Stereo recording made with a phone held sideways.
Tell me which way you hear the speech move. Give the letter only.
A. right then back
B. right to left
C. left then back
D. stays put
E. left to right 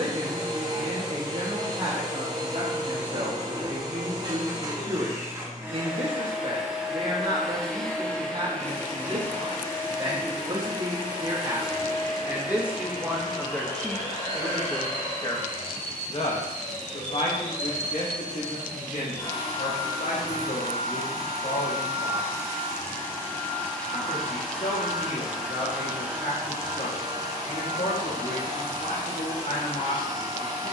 B.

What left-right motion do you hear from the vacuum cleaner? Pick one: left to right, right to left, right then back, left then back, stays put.
left then back.